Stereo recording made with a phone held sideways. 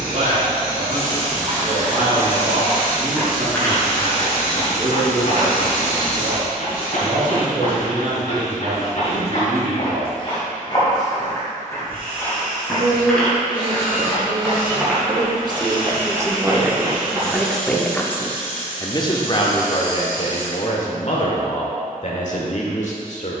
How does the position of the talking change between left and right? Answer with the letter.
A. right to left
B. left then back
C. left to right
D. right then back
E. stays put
A.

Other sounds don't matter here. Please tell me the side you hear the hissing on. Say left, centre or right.
right.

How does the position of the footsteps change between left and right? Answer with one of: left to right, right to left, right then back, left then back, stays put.
left then back.